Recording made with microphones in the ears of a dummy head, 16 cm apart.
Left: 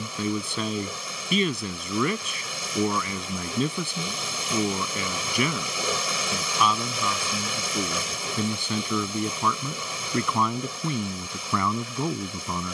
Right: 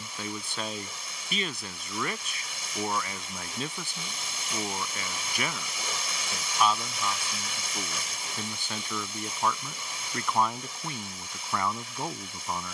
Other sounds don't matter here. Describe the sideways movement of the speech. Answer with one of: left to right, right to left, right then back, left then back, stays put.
stays put.